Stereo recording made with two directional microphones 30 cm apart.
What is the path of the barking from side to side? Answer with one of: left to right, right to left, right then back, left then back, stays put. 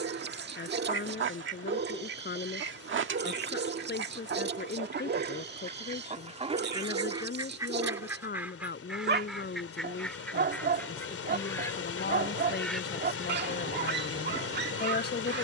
stays put.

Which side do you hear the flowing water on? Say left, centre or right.
left.